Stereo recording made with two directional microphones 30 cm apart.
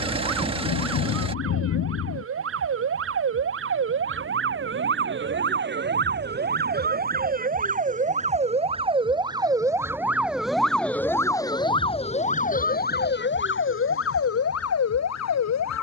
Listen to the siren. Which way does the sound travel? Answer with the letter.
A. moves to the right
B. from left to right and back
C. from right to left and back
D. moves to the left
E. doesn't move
D.